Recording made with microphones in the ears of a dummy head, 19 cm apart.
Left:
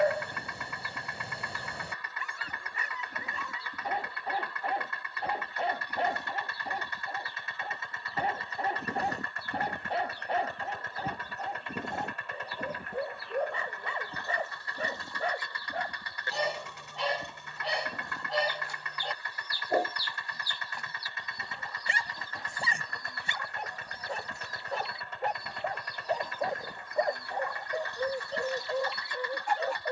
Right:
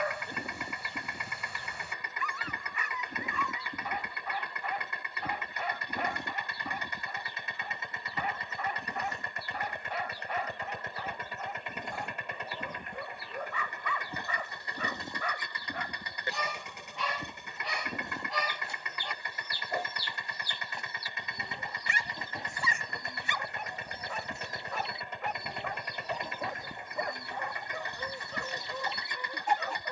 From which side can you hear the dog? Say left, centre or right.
left.